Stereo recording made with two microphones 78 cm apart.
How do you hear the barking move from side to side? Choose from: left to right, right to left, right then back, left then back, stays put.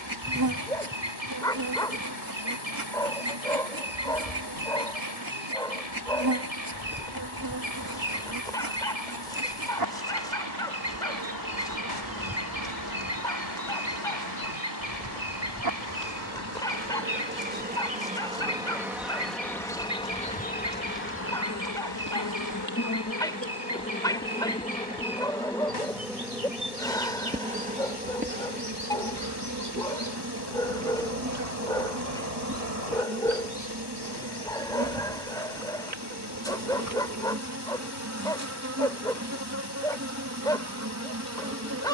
stays put.